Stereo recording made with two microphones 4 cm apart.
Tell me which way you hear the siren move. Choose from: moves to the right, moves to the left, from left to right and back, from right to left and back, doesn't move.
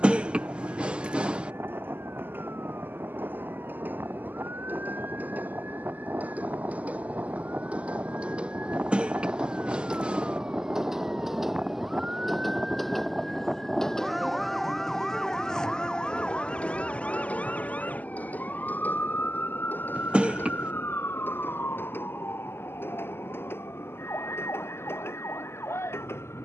moves to the left.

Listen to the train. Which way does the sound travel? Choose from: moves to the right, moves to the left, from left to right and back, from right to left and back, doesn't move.
moves to the left.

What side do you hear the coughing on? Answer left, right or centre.
right.